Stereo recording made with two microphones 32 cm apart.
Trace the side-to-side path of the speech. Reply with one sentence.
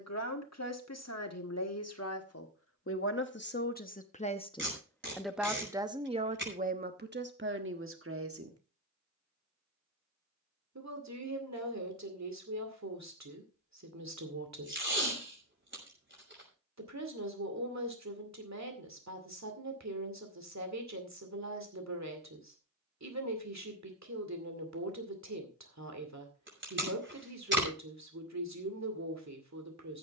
You can hear the speech travel towards the right.